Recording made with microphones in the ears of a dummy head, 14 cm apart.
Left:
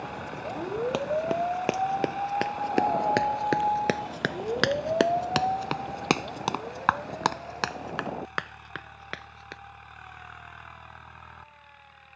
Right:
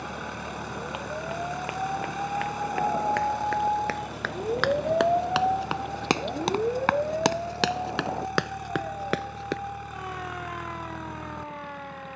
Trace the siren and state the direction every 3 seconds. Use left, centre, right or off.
left, centre, right, right.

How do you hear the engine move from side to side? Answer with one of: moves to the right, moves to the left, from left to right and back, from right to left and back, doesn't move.
doesn't move.